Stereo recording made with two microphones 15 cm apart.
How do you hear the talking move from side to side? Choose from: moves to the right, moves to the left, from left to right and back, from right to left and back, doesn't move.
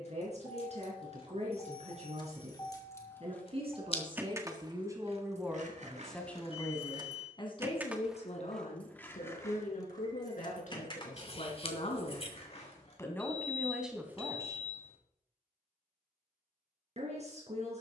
from right to left and back.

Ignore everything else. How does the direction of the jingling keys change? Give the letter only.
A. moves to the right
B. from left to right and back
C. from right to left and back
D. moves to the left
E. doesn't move
B.